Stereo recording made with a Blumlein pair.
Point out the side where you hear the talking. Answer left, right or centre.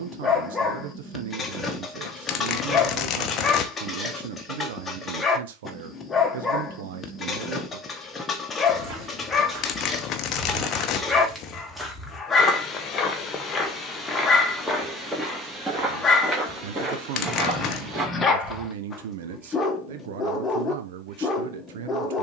right.